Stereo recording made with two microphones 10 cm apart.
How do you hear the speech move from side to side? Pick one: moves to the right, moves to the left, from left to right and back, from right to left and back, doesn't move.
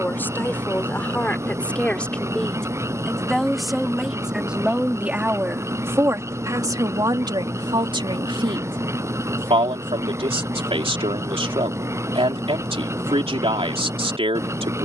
moves to the right.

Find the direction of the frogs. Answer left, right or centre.
right.